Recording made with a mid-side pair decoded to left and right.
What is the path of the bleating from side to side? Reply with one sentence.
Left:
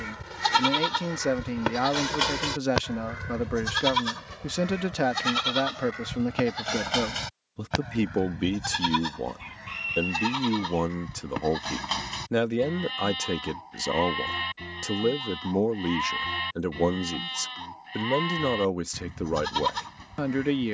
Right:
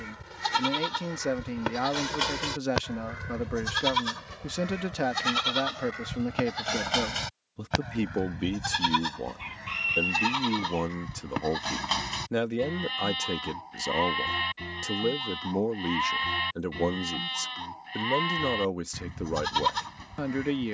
In this clip you hear the bleating travel towards the right.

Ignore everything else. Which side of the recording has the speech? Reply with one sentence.
You can hear the speech on the left.